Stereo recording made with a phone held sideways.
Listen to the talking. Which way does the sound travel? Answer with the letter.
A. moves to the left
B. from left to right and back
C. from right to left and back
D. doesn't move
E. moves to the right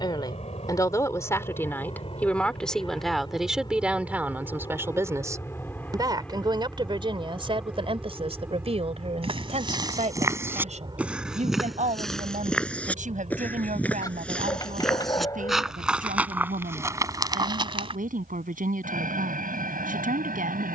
E.